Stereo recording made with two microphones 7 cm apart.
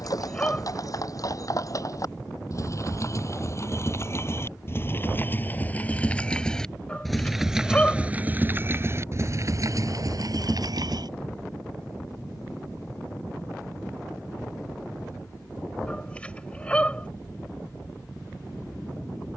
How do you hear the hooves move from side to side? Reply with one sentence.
In this clip you hear the hooves move from left to right.